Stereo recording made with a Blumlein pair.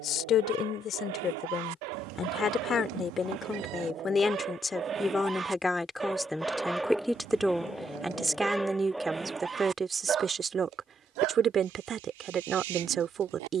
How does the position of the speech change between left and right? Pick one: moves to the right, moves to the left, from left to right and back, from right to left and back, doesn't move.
moves to the right.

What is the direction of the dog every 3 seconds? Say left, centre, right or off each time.
right, right, centre, right, right.